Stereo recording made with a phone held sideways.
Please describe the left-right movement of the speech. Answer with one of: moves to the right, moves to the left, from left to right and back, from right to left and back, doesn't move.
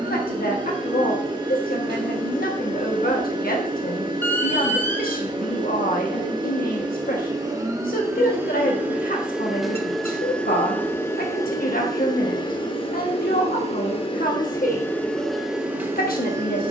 doesn't move.